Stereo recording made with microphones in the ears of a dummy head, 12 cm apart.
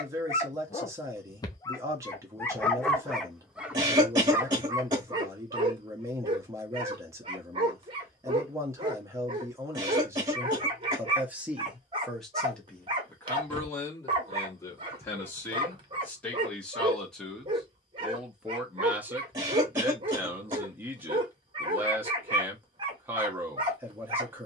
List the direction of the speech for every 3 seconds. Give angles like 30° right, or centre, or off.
20° right, 20° right, 20° right, 20° right, 10° left, 10° left, 10° right, 20° right.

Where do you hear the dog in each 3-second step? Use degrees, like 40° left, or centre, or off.
20° left, 20° right, 40° right, 40° right, 40° right, 40° right, 40° right, 40° right.